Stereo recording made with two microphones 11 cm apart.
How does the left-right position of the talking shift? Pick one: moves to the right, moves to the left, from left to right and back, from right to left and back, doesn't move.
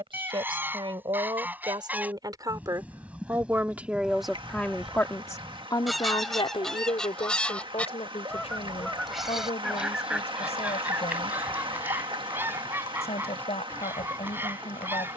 moves to the left.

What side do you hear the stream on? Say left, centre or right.
right.